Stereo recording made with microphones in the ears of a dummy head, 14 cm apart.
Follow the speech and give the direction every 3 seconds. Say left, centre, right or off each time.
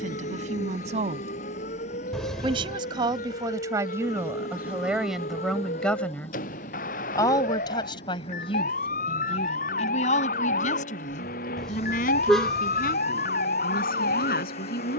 right, centre, left, left, left.